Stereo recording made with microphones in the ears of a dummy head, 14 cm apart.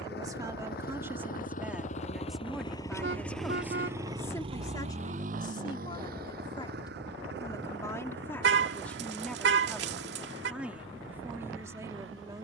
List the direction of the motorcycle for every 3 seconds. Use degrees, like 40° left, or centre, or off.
50° left, 30° right, 70° right, 80° right.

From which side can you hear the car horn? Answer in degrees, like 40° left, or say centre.
70° right.